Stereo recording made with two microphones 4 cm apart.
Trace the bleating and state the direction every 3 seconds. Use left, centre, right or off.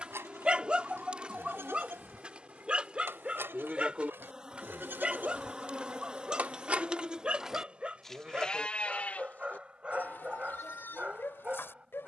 right, right, centre, left.